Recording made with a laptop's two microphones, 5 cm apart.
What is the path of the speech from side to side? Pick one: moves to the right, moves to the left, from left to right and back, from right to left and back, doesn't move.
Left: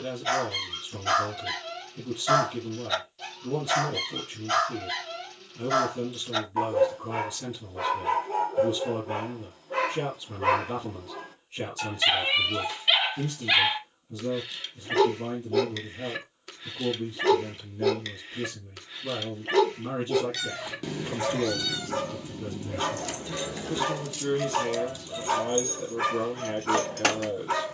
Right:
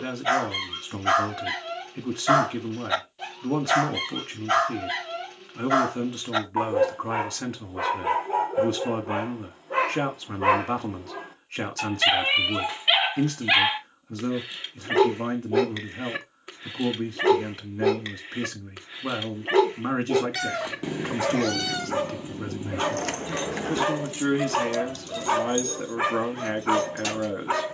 doesn't move.